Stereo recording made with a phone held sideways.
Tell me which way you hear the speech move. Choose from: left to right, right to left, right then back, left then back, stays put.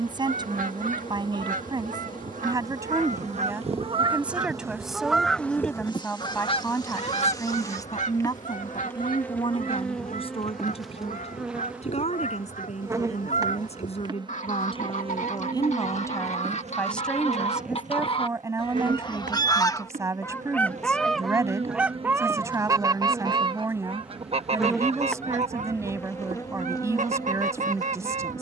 left then back.